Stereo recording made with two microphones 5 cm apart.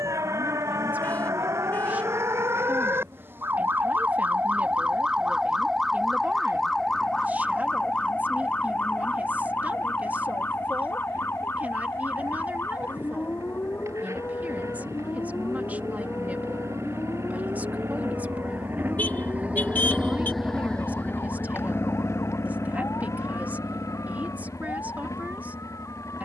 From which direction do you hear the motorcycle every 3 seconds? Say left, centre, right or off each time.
right, right, right, right, right, right, right, left, left.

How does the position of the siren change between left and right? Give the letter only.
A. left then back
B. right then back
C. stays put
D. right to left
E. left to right
D.